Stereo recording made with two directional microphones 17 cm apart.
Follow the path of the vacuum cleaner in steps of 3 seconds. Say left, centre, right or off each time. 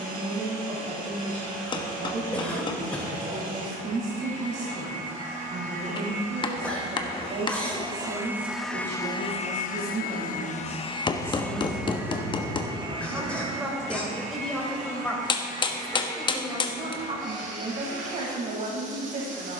right, right, right, left, right, right, right.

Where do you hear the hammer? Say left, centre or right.
left.